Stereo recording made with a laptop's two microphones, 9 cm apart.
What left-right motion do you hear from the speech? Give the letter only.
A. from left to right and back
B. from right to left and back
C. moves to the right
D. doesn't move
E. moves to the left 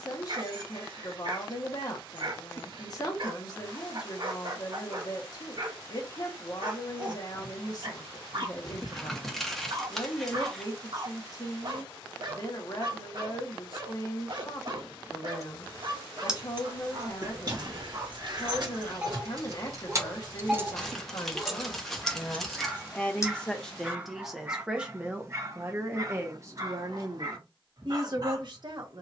C.